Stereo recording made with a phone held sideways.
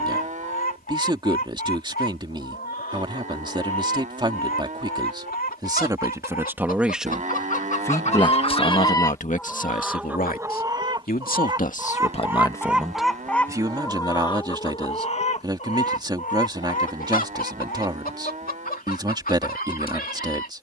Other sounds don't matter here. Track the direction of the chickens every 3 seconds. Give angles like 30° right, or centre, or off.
80° left, 80° left, 50° left, 10° right, 10° left, 60° left, 70° left.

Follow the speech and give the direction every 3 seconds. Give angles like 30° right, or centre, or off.
30° right, 30° right, 10° left, 60° left, 10° right, 30° right, 30° right.